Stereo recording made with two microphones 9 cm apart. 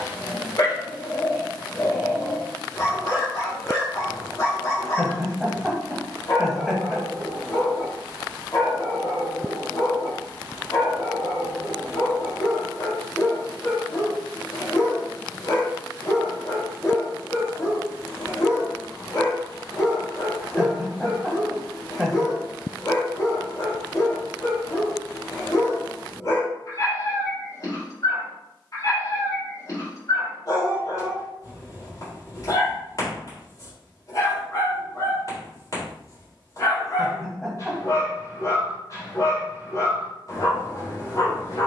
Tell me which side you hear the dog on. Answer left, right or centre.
left.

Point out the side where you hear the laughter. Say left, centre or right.
centre.